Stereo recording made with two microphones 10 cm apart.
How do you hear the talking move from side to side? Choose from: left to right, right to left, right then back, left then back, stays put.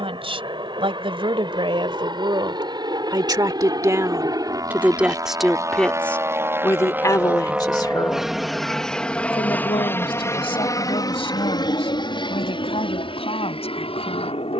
right to left.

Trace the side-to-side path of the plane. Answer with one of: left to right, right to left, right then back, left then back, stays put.
right to left.